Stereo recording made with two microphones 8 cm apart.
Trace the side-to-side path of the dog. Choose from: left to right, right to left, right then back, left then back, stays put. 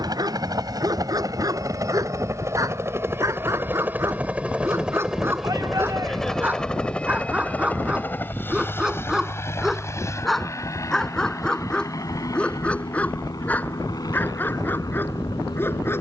right to left.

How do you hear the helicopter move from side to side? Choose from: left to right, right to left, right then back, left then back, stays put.
right to left.